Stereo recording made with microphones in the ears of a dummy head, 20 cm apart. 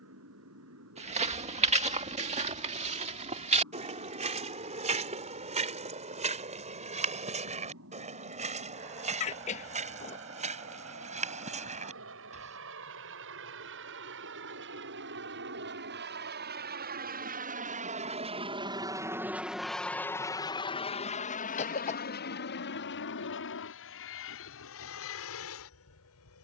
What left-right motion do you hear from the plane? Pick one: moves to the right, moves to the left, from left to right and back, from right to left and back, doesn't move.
moves to the left.